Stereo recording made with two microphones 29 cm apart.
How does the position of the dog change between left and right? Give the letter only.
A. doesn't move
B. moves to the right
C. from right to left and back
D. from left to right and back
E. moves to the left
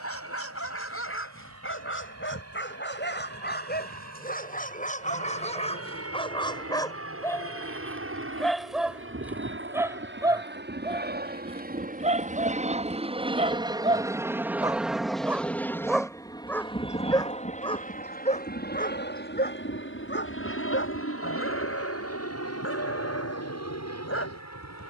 D.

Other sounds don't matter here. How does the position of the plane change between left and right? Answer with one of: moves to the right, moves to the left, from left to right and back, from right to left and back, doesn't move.
moves to the left.